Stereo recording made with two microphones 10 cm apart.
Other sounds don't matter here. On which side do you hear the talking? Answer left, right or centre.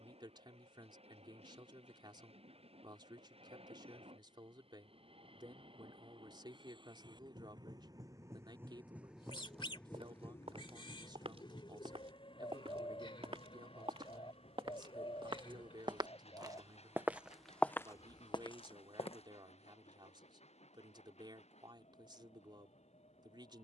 right.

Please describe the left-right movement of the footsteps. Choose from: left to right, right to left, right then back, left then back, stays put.
right to left.